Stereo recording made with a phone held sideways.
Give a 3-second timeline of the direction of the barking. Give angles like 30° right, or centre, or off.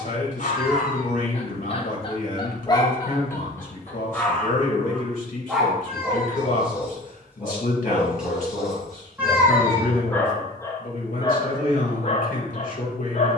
40° left, 10° left, 10° right, 20° left, 40° left.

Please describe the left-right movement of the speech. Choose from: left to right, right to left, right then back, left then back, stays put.
stays put.